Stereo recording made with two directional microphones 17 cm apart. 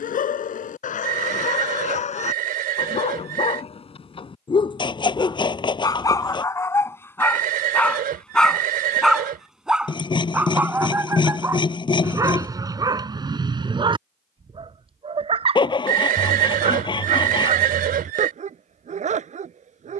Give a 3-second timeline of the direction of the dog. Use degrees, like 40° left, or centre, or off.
40° left, 30° left, 10° left, 10° right, 20° right, 40° right, 40° right.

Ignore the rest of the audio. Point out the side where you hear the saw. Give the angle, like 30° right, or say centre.
30° left.